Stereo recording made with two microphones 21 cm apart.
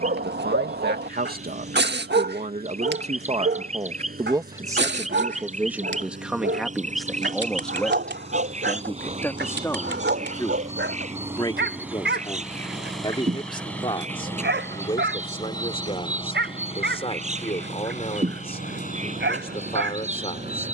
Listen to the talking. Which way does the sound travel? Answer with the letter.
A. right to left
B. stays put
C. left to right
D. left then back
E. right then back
A.